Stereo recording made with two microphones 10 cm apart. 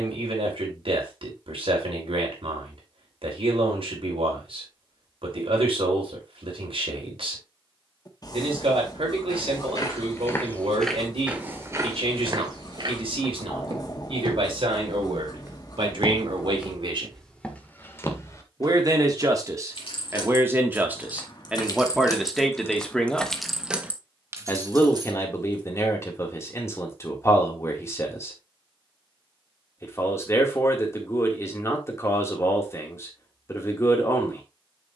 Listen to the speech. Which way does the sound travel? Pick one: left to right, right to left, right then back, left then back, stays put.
right to left.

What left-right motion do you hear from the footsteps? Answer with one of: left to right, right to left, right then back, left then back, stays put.
right then back.